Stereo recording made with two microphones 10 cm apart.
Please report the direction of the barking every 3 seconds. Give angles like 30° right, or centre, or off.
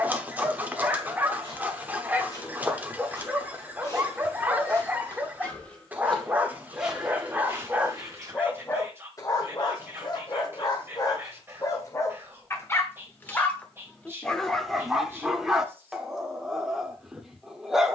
20° right, 20° right, 10° right, 40° left, 10° left, centre.